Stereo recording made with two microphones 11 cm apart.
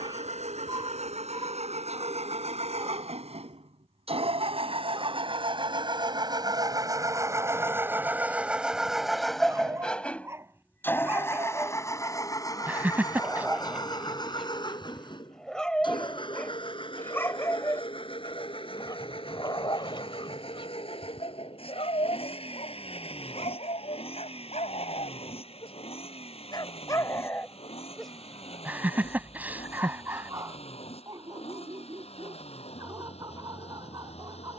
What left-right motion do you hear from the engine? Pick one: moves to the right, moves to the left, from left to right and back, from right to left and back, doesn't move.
moves to the left.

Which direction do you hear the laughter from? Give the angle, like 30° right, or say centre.
20° right.